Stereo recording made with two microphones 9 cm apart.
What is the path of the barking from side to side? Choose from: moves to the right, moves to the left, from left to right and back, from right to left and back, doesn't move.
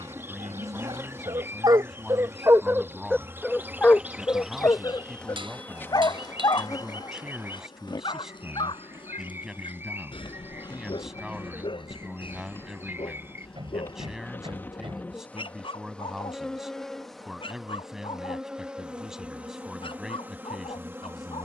moves to the left.